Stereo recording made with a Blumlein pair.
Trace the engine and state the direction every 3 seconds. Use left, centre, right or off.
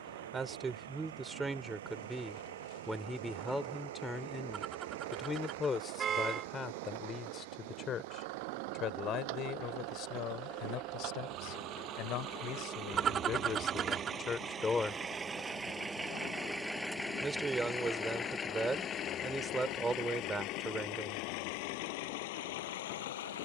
right, right, right, right, right, centre, left, left.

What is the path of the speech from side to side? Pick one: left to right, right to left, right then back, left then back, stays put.
left then back.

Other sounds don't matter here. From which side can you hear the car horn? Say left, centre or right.
right.